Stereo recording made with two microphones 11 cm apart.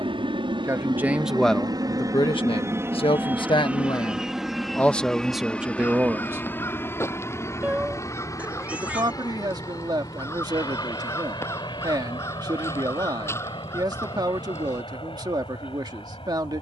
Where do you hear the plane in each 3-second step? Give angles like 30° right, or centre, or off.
40° right, centre, 20° left, 40° left, 50° left, 50° left.